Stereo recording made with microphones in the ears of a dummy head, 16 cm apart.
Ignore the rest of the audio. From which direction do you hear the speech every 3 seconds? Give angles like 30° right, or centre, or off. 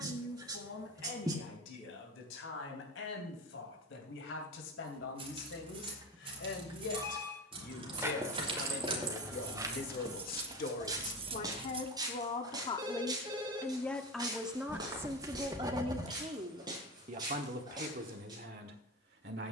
70° left, 70° left, 60° left, 50° left, 10° left, 30° right, 60° right.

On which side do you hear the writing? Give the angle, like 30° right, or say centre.
20° right.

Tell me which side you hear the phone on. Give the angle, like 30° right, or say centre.
20° right.